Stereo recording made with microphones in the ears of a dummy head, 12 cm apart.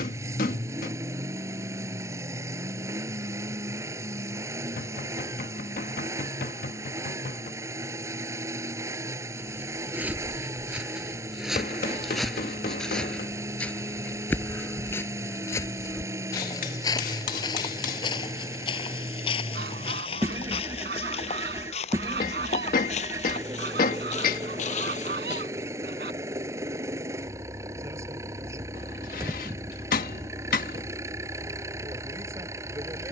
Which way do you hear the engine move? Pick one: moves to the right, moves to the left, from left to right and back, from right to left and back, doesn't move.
doesn't move.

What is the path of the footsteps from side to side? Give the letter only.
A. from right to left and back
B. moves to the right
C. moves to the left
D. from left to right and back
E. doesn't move
C.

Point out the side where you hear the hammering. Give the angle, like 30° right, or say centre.
70° left.